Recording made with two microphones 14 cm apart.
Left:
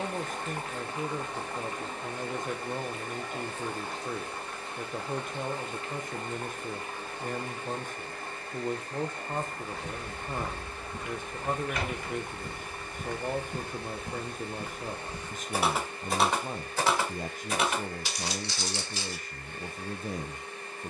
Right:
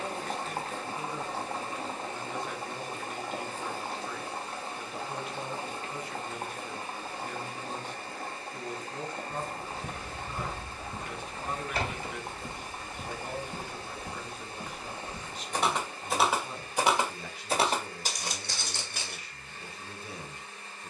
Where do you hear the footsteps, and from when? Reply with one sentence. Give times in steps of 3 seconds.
In this clip you hear the footsteps not at all from 0 s, on the right from 9 s, in the centre from 12 s and on the right from 18 s.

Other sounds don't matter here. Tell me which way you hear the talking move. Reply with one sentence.
You can hear the talking stay put.